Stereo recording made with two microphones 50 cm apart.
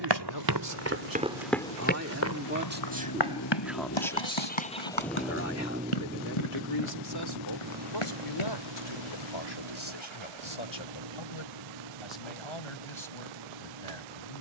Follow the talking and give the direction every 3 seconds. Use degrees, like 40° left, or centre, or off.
40° right, 10° left, 50° left, 60° left, 70° left.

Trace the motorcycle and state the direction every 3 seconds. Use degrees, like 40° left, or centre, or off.
60° left, 20° left, 40° right, 60° right, 70° right.